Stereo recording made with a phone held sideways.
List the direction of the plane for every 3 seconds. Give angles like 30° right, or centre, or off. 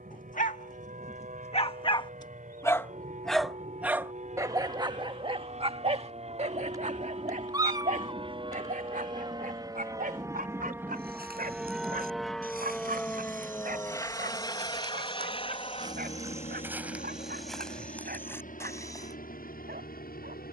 60° right, 50° right, 40° right, 20° right, 10° left, 40° left, 60° left.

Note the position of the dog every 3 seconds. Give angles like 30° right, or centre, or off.
40° left, 20° right, 50° right, 60° right, 70° right, 70° right, 70° right.